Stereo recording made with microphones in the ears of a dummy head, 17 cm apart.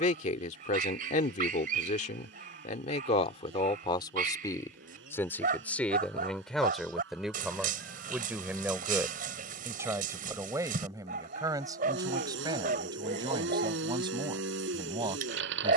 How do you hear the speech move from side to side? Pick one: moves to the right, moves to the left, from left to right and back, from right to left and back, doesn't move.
moves to the right.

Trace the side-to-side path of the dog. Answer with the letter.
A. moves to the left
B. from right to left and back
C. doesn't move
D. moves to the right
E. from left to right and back
C.